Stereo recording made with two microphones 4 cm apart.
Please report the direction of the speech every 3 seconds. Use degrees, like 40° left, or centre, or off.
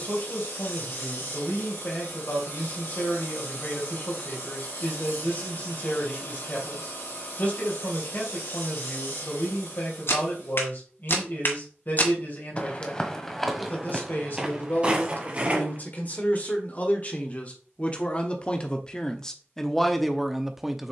50° left, 50° left, 50° left, 50° left, 50° left, 40° left, 10° left.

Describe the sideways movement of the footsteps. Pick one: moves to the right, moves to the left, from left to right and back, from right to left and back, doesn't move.
moves to the right.